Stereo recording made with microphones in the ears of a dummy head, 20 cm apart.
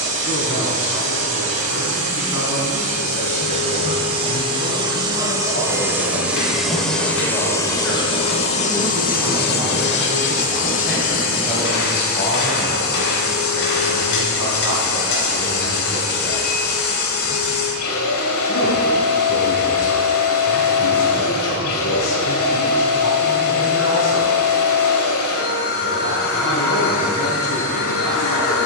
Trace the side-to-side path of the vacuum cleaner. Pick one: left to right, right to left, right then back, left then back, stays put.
right to left.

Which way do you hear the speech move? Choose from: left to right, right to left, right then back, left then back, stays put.
right then back.